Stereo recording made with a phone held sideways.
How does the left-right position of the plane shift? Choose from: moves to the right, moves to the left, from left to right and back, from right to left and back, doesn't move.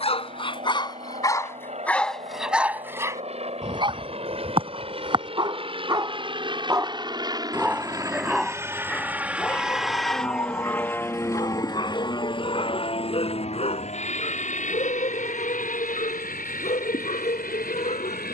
moves to the left.